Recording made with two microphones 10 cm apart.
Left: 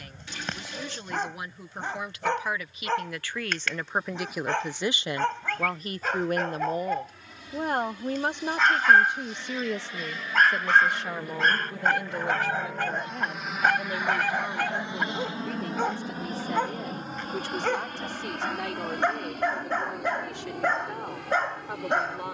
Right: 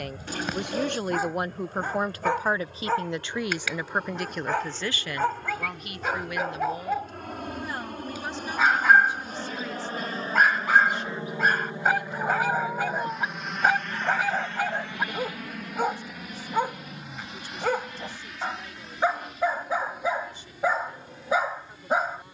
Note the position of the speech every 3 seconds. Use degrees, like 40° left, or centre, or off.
50° right, centre, 50° left, 60° left, 70° left, 70° left, 80° left, 80° left.